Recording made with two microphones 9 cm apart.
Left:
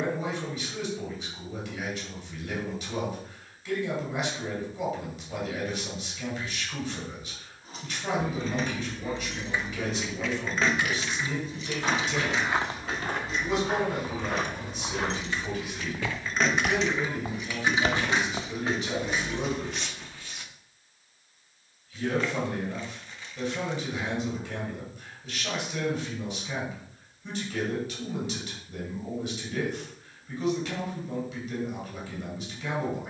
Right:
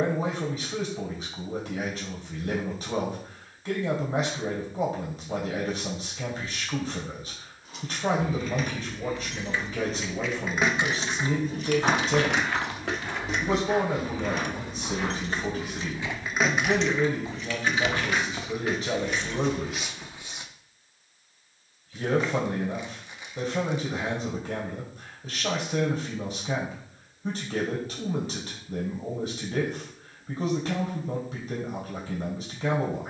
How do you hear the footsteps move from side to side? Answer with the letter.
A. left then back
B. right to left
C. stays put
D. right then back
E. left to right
A.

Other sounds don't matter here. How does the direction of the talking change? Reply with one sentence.
You can hear the talking stay in one place.